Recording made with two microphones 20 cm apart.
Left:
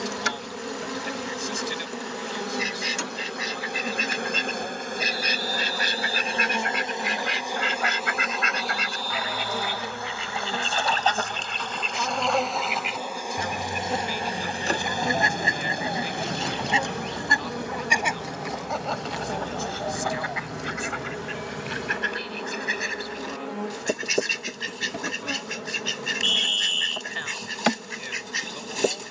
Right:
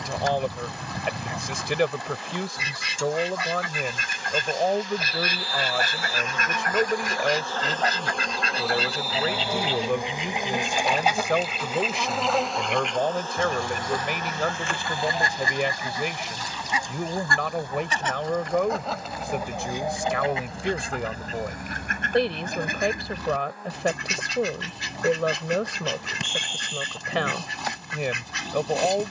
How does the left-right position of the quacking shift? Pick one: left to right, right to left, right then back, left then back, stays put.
left then back.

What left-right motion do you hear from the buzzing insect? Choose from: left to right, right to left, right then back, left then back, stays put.
right then back.